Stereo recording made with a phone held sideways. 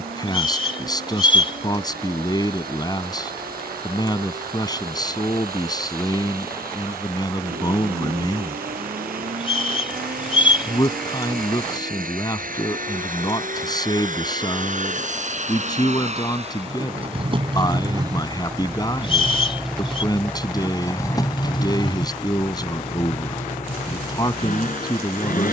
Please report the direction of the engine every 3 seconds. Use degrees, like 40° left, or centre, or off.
80° right, 80° right, 70° right, 70° right, 60° right, 40° right, centre, 40° left, 60° left.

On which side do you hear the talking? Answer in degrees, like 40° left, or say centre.
30° left.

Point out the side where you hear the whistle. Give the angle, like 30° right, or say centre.
40° left.